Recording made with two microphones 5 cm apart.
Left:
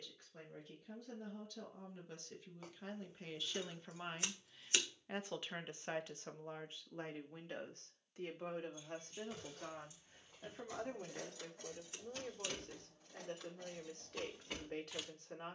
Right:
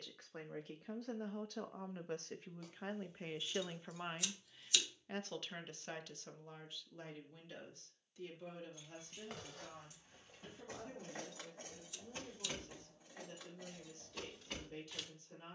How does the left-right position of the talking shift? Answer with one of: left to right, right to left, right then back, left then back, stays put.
right to left.